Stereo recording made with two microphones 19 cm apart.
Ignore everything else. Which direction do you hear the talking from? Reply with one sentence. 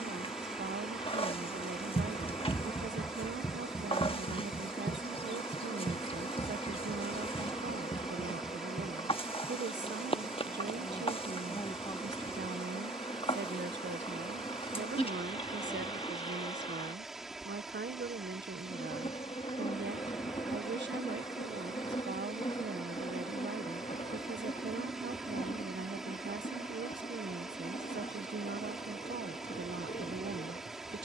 You can hear the talking on the right.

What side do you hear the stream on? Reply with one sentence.
You can hear the stream in the centre.